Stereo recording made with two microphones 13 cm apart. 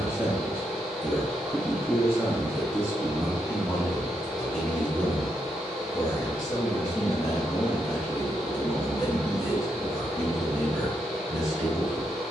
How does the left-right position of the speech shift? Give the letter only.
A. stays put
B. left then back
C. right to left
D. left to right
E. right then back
B.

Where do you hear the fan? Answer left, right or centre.
centre.